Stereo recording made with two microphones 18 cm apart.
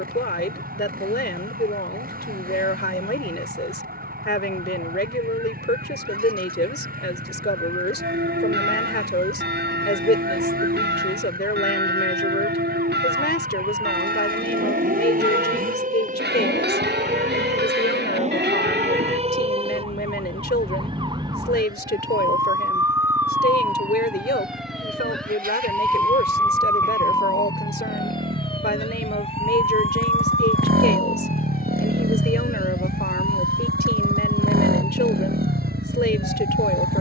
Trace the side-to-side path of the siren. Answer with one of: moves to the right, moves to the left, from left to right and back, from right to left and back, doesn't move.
moves to the left.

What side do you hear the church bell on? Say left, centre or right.
right.